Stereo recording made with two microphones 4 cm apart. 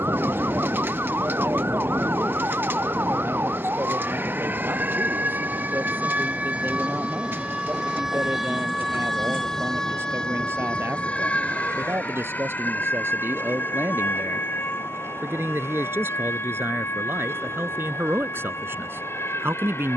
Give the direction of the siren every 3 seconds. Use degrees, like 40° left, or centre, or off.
60° right, 50° right, 20° right, 20° left, 50° left, 60° left, 70° left.